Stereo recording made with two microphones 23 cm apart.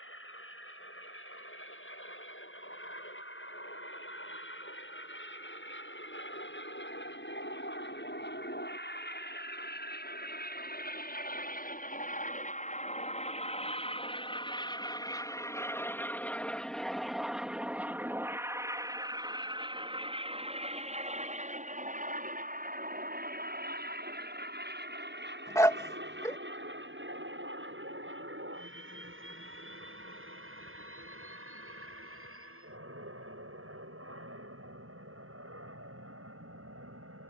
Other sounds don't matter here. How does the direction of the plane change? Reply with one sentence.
In this clip you hear the plane go from the left side to the right.